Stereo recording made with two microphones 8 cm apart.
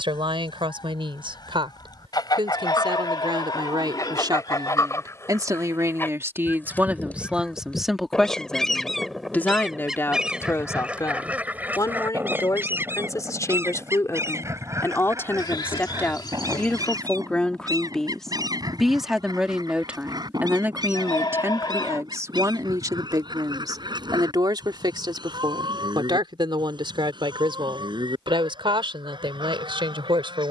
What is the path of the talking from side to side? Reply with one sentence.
In this clip you hear the talking move from right to left and back again.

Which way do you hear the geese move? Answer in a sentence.
You can hear the geese travel towards the right.